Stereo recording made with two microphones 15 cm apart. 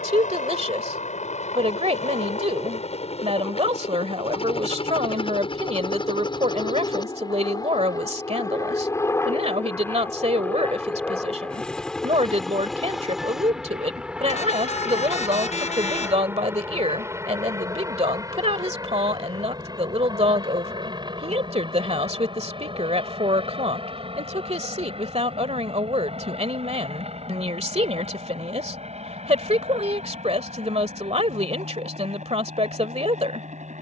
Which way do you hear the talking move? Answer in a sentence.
You can hear the talking stay in one place.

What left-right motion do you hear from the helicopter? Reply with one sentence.
In this clip you hear the helicopter move from left to right.